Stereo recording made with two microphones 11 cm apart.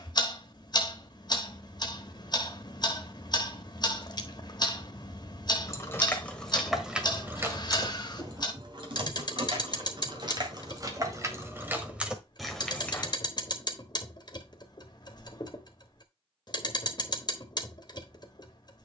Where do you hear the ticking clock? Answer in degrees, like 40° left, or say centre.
40° left.